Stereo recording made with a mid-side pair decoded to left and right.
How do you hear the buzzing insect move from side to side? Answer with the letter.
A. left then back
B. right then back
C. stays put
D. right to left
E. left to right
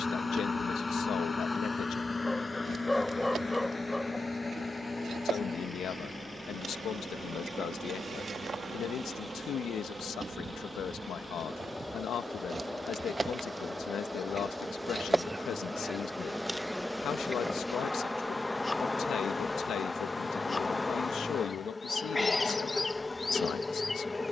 D.